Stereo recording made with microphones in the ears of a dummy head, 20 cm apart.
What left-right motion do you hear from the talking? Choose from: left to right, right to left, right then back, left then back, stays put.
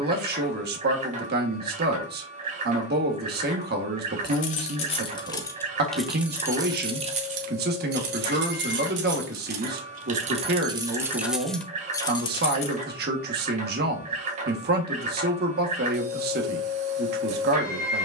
stays put.